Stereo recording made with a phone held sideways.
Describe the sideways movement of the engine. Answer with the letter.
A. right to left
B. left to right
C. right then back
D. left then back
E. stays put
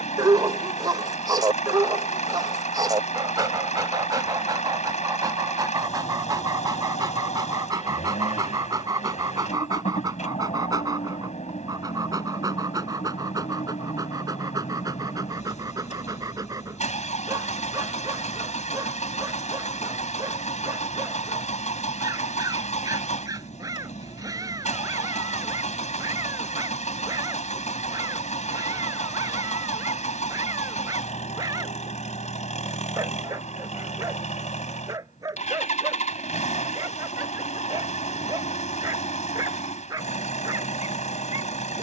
E.